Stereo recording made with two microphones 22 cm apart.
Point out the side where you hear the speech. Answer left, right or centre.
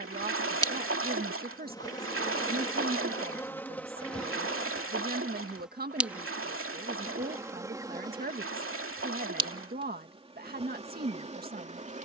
right.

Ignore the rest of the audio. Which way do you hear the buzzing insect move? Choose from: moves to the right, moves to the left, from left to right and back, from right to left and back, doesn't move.
moves to the right.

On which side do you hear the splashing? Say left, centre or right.
right.